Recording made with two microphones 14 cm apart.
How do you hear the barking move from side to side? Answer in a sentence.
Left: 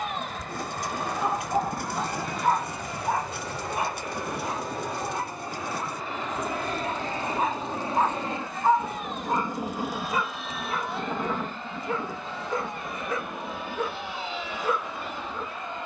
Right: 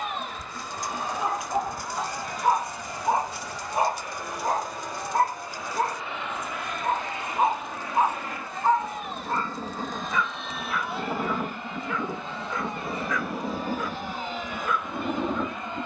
You can hear the barking go right and come back.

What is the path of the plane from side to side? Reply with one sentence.
In this clip you hear the plane move from left to right.